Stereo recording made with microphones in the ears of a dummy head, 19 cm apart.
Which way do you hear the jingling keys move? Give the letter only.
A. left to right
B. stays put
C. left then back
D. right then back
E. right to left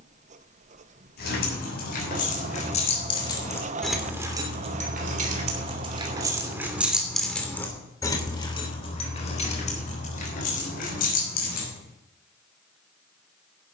D.